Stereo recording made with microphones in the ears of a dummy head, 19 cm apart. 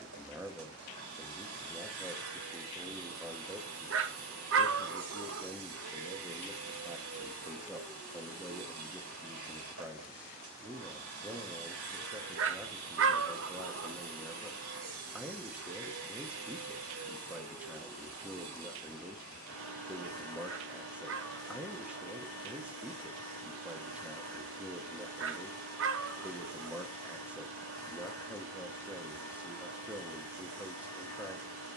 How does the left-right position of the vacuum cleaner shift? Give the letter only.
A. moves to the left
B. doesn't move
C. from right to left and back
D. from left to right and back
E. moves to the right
B.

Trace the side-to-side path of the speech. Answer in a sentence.
In this clip you hear the speech stay put.